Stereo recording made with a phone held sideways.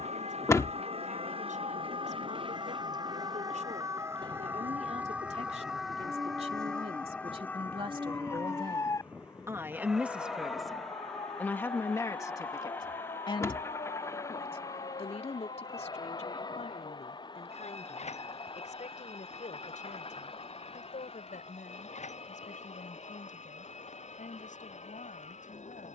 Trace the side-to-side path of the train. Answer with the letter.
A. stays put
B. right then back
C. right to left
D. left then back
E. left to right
C.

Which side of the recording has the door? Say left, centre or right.
left.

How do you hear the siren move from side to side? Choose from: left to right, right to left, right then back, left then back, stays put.
right to left.